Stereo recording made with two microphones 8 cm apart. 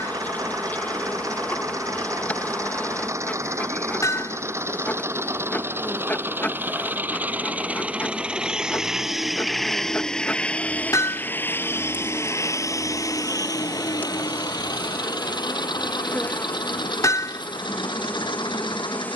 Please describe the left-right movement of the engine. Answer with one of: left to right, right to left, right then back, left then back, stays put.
right to left.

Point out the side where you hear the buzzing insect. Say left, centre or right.
left.